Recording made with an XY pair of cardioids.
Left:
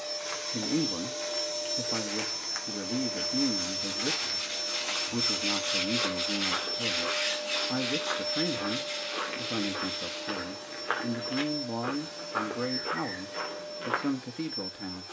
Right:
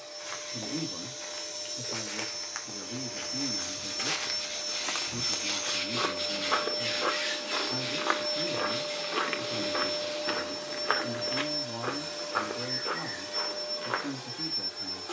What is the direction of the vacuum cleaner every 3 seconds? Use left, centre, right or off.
left, left, centre, right, right.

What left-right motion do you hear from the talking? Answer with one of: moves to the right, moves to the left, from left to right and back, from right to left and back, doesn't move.
doesn't move.